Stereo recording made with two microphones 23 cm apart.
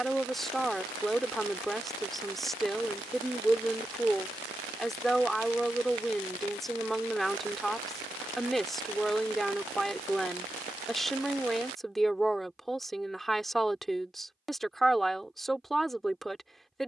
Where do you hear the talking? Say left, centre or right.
centre.